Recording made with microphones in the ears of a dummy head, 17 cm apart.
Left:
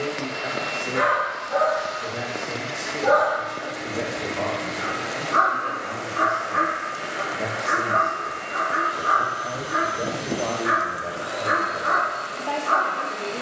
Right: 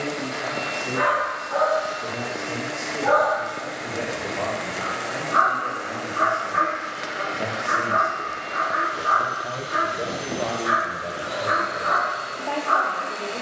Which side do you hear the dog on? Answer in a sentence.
In this clip you hear the dog on the left.